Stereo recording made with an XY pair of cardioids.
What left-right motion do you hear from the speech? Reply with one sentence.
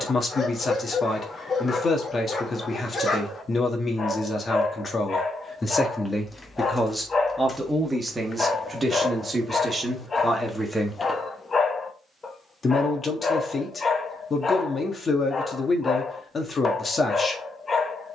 You can hear the speech move from left to right and back again.